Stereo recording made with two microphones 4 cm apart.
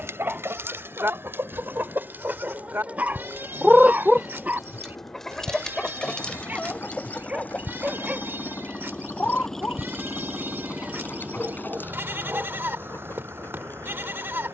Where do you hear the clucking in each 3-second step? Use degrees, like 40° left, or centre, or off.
60° right, centre, 30° left, 50° left, 50° left.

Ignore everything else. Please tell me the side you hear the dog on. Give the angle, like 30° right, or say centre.
30° right.